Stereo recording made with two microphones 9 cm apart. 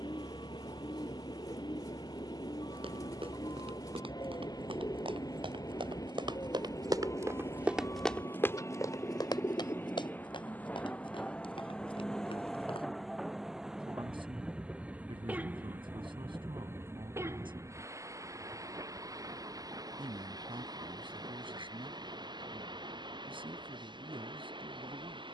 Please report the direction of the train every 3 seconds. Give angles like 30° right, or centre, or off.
60° left, 50° left, 40° left, 20° left, centre, 20° right, 40° right, 50° right, 60° right.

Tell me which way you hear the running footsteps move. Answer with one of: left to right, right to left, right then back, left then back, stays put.
right to left.